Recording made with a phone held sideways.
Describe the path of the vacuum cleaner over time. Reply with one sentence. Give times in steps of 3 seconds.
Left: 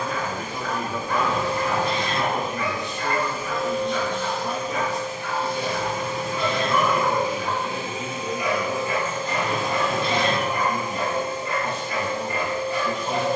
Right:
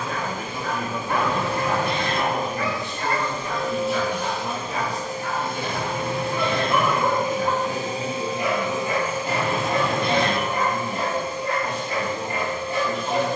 In this clip you hear the vacuum cleaner on the left from 0 s, on the right from 3 s, in the centre from 9 s and on the left from 12 s.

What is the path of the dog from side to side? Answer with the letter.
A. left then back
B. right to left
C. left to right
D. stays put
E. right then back
D.